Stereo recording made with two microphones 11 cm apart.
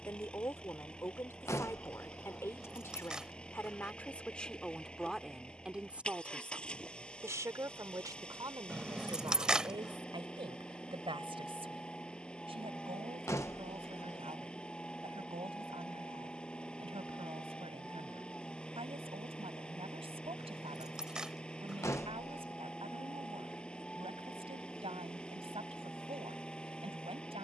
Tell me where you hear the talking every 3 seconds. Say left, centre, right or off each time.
left, centre, right, right, right, right, right, right, right.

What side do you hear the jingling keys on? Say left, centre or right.
centre.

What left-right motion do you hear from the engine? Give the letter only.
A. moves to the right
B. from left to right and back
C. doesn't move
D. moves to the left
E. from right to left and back
C.